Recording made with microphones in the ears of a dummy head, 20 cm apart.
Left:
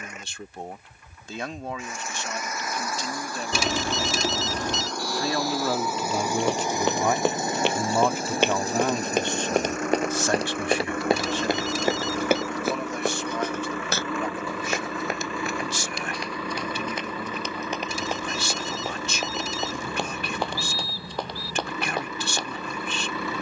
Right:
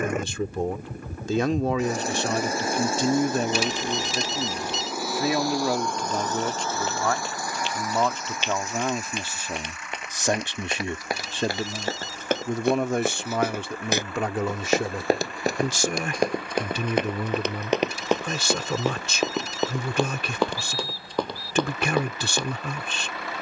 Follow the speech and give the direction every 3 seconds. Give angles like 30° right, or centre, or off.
60° right, 20° right, 10° left, 20° right, 50° right, 60° right, 70° right, 70° right.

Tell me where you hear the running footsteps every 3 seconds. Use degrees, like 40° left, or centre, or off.
off, off, 50° left, 30° left, 10° right, 40° right, 60° right, 70° right.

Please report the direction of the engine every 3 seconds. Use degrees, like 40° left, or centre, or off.
30° right, 10° right, 20° left, 40° left, 50° left, 60° left, 70° left, 70° left.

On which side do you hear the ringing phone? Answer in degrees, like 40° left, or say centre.
60° left.